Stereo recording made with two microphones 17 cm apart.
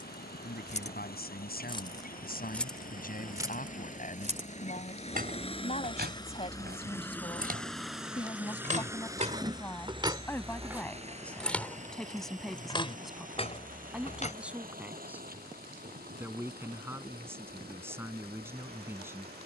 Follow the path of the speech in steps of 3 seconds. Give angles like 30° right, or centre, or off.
70° left, 50° left, 30° left, 10° left, centre, 10° right, 10° right.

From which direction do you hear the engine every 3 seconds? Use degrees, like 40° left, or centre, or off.
60° left, 40° left, 10° left, 30° right, 50° right, 60° right, 70° right.